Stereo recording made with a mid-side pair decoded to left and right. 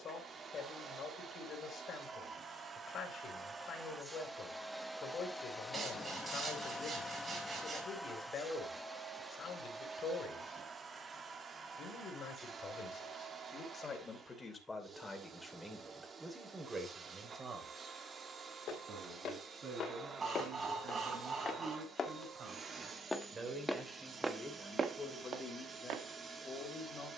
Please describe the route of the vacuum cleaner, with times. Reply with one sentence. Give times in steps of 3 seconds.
In this clip you hear the vacuum cleaner on the right from 0 s, in the centre from 3 s and on the right from 9 s.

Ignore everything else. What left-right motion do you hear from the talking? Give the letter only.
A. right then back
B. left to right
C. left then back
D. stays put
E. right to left
A.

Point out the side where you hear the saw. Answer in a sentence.
You can hear the saw on the right.